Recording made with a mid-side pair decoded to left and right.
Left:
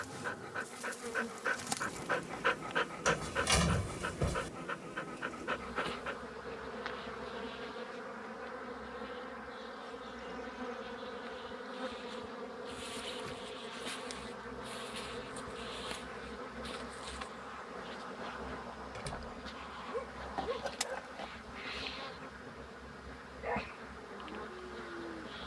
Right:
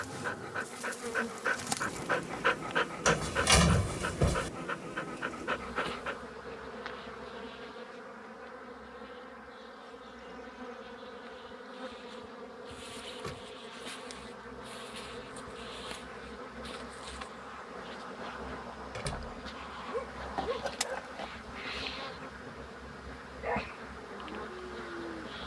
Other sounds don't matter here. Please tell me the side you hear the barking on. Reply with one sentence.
You can hear the barking on the right.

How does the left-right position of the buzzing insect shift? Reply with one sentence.
In this clip you hear the buzzing insect move from right to left and back again.